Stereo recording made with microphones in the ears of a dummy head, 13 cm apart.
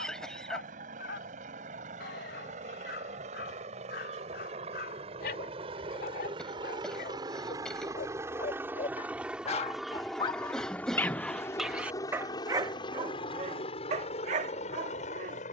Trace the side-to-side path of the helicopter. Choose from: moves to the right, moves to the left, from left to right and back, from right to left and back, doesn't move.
moves to the left.